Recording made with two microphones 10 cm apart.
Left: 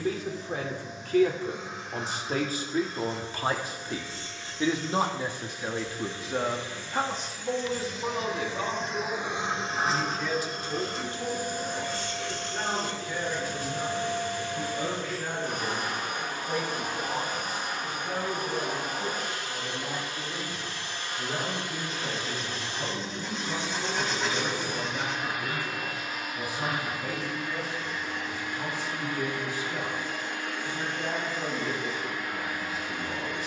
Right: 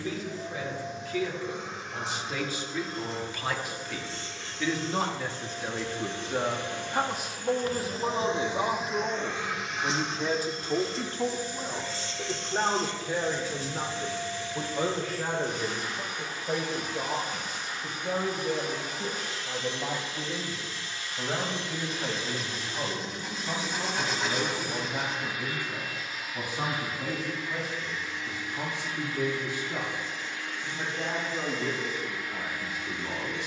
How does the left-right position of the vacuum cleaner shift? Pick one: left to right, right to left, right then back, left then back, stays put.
right to left.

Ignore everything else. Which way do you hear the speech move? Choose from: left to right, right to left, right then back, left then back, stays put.
left to right.